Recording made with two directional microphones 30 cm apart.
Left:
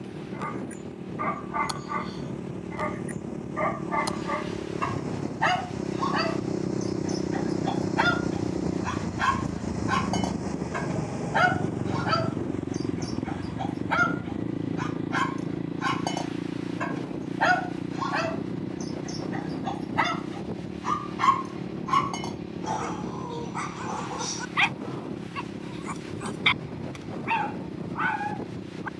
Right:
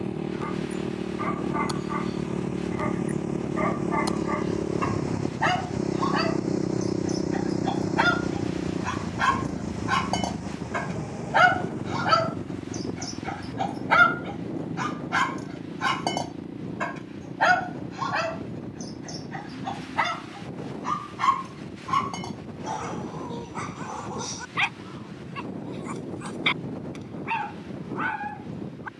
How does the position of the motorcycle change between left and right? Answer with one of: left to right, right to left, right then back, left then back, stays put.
right to left.